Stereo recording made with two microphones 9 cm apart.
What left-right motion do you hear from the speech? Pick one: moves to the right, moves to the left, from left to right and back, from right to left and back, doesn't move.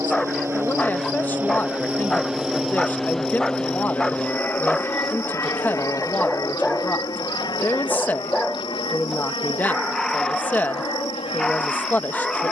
doesn't move.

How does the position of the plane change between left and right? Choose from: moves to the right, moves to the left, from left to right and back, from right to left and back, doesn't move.
moves to the left.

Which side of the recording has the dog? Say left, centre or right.
centre.